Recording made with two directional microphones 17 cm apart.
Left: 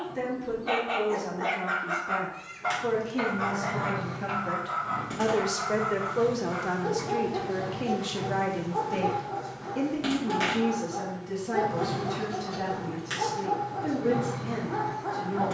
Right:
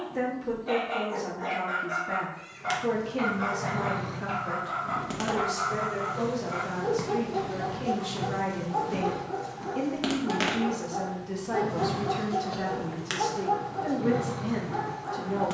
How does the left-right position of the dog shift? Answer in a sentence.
In this clip you hear the dog move from left to right and back again.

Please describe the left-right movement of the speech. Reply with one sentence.
In this clip you hear the speech go left and come back.